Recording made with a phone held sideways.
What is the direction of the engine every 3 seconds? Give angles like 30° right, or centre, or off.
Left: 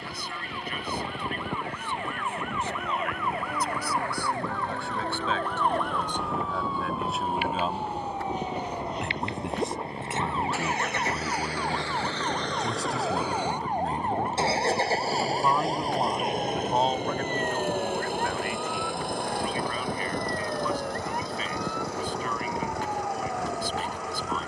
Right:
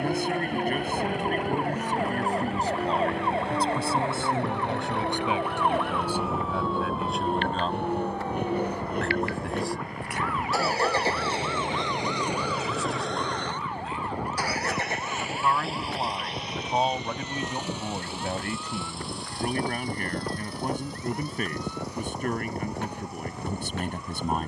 80° right, 70° right, 60° right, 40° right, 10° left, 50° left, 60° left, 70° left.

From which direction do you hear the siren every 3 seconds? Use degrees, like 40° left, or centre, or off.
40° right, 20° right, 10° left, 30° left, 40° left, 50° left, 60° left, 60° left.